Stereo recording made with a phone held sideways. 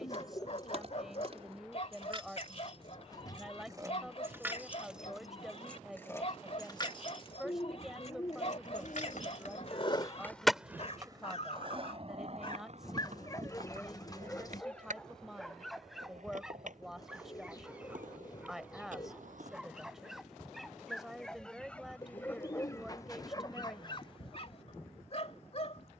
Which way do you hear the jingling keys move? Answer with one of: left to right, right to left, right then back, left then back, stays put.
right to left.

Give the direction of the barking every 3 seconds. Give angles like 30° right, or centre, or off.
50° left, 50° left, 50° left, 50° left, 20° left, centre, centre, 20° left, 50° left.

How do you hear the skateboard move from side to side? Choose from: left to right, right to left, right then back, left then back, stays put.
left to right.